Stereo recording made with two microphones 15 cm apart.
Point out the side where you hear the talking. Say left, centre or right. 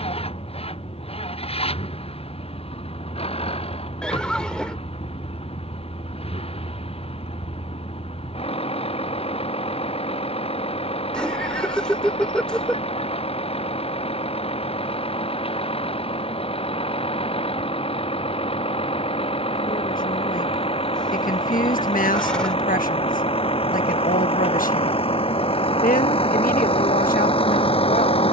left.